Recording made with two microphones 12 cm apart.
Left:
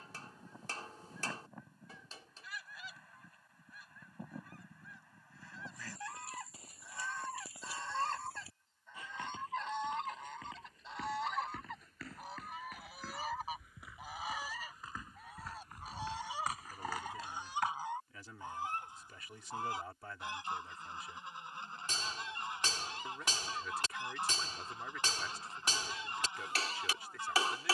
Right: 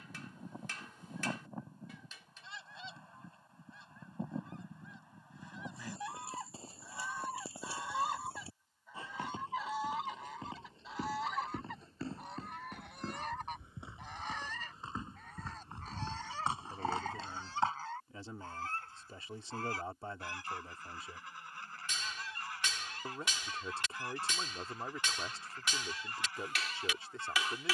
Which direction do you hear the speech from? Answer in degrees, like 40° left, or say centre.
30° right.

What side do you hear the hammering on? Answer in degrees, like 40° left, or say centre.
30° left.